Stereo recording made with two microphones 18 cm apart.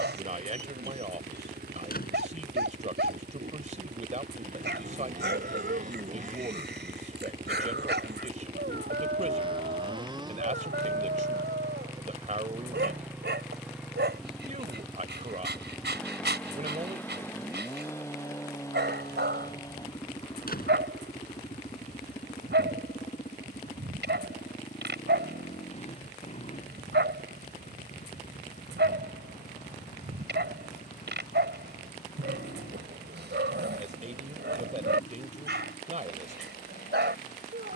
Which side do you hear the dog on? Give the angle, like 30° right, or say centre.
80° right.